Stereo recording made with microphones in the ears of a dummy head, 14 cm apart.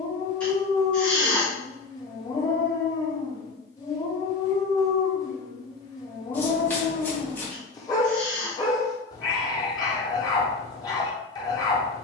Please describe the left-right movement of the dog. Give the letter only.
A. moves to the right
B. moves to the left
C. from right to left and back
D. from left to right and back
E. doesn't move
E.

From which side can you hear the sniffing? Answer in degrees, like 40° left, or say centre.
10° left.